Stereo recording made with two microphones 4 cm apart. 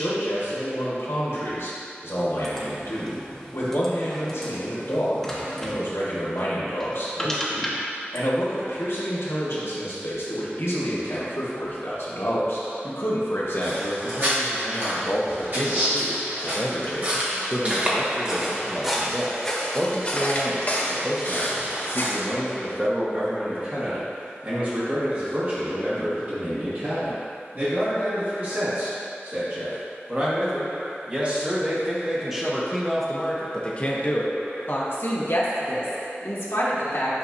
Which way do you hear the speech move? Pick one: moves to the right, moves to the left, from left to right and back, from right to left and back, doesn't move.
from left to right and back.